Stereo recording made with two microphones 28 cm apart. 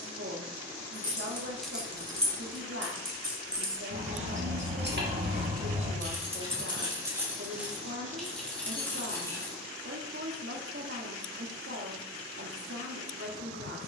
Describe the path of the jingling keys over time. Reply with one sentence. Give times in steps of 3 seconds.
You can hear the jingling keys in the centre from 0 s, on the right from 3 s, in the centre from 6 s and not at all from 12 s.